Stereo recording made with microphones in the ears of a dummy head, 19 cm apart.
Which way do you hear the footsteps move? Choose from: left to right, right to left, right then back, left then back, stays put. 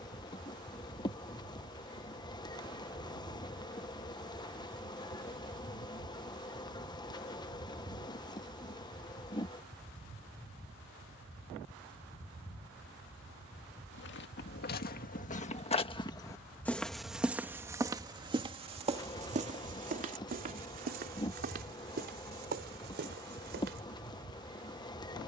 left to right.